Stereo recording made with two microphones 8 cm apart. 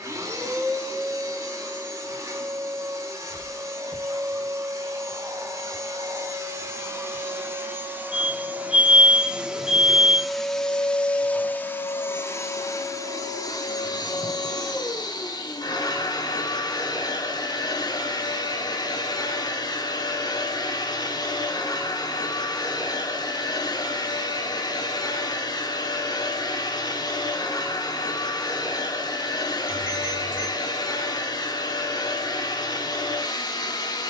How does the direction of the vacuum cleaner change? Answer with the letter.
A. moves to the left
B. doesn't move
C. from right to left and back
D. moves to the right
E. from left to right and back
A.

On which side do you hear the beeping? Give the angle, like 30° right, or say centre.
10° right.